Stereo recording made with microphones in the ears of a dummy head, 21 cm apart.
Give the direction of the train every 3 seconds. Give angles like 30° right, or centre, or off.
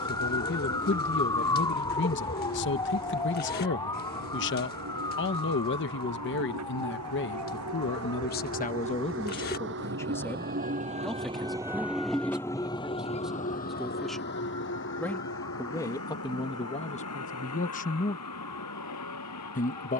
80° right, 80° right, 70° right, 40° right, 30° left, 60° left, 70° left.